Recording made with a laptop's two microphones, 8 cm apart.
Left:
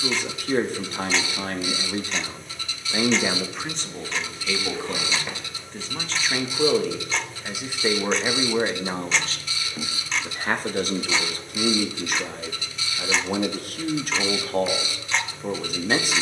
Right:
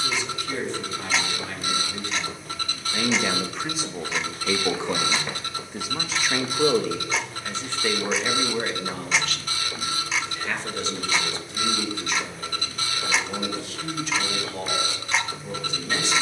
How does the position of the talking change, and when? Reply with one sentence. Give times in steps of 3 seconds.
In this clip you hear the talking on the left from 0 s, in the centre from 3 s and on the left from 9 s.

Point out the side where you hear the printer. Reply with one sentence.
You can hear the printer on the right.